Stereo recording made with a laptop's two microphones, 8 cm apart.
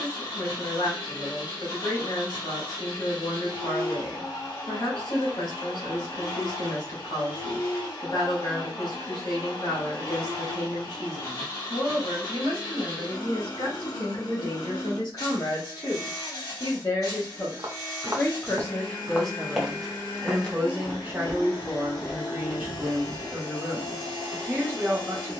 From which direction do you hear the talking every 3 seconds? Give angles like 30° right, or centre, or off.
80° left, 80° left, 80° left, 80° left, 70° left, 50° left, centre, 20° right, 20° right.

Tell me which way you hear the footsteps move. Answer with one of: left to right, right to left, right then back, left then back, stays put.
left then back.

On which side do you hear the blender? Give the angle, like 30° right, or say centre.
50° left.